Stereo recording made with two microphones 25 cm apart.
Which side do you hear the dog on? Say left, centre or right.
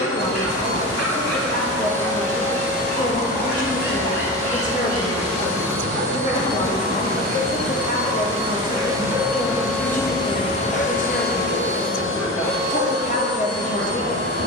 left.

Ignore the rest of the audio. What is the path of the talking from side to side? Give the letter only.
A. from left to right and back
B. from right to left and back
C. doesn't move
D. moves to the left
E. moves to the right
C.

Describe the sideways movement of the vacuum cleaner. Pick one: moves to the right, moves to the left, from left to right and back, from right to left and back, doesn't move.
moves to the left.